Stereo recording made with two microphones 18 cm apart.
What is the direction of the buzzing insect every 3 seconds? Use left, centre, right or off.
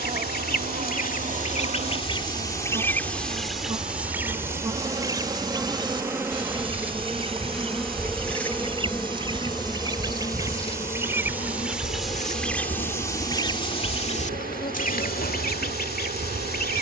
right, right, centre, left, left, left.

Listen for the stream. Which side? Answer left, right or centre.
right.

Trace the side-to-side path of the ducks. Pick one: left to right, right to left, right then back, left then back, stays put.
right then back.